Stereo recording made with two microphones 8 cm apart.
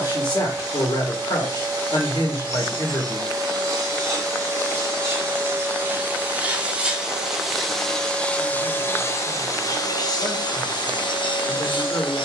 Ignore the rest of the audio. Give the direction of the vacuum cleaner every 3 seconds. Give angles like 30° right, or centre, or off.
40° right, 30° right, centre, 50° left.